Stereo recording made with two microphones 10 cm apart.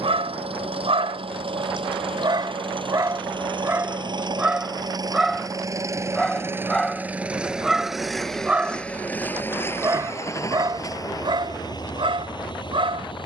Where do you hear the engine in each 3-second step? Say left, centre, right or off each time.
right, right, centre, left, left.